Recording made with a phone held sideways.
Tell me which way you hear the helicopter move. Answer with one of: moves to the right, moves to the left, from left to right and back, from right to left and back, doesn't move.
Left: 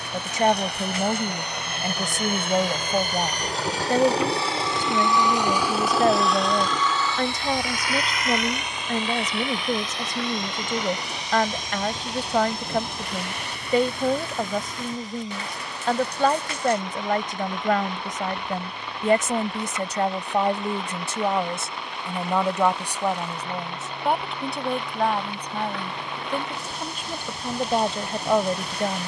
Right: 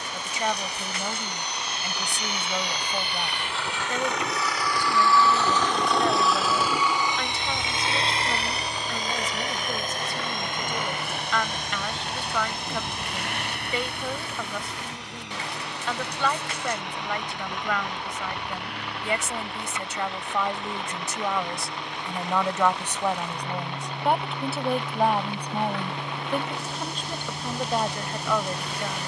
moves to the right.